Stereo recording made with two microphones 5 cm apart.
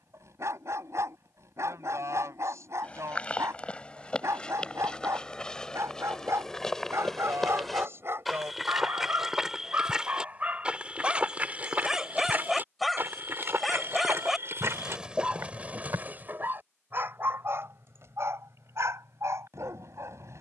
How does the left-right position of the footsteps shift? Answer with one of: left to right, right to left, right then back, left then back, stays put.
left to right.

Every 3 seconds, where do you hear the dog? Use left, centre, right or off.
right, right, right, right, centre, right, right.